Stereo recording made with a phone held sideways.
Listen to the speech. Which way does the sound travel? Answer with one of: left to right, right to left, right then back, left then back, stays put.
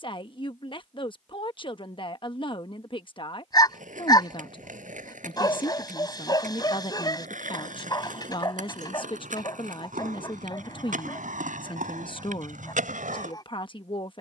stays put.